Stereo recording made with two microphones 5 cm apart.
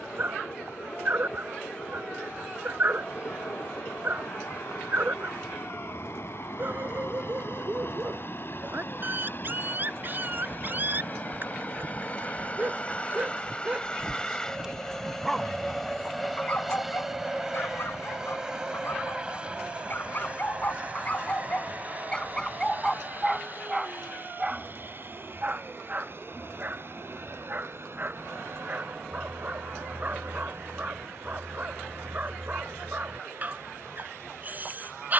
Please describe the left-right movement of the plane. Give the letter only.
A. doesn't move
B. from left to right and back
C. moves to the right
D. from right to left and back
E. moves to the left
C.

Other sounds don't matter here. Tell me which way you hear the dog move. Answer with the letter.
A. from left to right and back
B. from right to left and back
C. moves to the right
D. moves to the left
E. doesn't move
B.